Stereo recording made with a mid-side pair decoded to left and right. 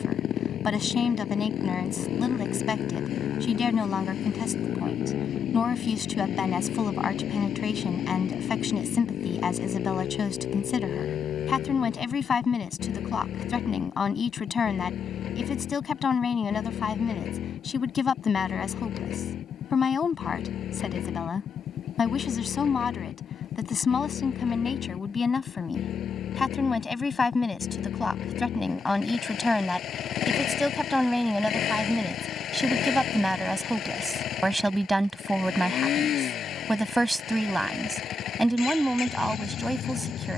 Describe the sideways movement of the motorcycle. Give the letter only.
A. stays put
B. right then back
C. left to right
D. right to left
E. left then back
A.